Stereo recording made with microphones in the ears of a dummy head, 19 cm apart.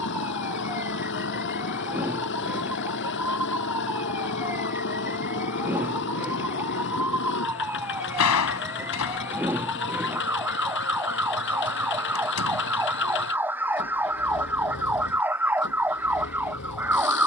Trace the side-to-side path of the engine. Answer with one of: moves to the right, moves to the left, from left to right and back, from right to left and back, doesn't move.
doesn't move.